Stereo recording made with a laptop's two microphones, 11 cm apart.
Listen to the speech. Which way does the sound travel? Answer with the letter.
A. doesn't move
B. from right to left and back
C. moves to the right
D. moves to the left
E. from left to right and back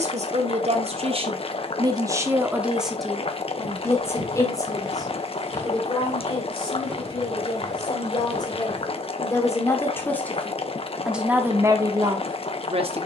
B.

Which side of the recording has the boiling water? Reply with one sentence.
You can hear the boiling water on the left.